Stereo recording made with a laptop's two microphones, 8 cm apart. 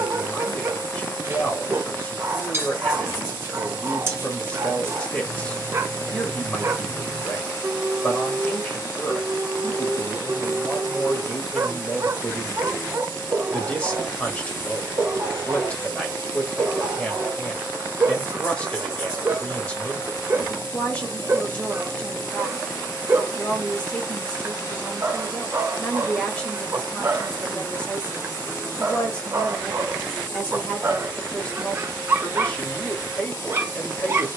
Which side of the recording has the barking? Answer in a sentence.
In this clip you hear the barking on the right.